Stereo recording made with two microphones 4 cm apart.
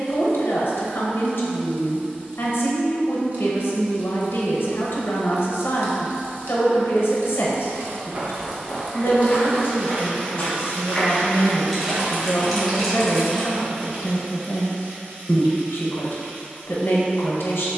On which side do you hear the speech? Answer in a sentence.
In this clip you hear the speech on the left.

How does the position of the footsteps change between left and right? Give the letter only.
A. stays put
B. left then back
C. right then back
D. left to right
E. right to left
B.